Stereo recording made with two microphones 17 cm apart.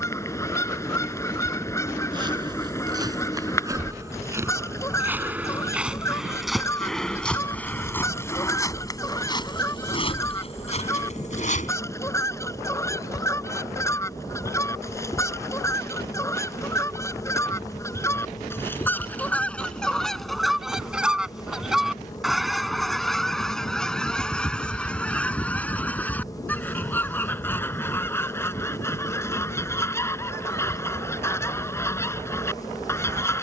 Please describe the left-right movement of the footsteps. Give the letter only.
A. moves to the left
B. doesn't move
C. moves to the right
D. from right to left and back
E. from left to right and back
A.